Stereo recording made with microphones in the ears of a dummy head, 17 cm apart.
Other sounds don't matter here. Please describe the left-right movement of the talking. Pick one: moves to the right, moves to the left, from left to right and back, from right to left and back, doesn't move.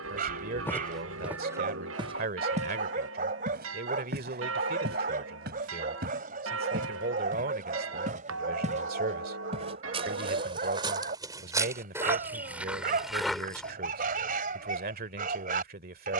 doesn't move.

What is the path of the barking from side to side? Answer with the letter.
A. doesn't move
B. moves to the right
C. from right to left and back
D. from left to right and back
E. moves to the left
A.